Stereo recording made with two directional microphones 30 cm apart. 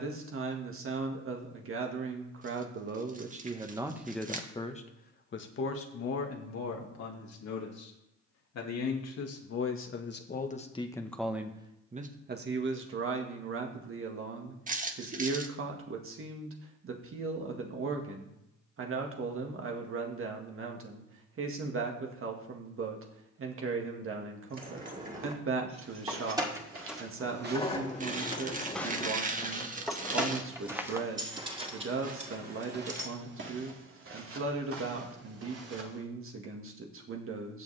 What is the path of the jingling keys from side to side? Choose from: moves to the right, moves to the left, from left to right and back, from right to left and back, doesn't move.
from right to left and back.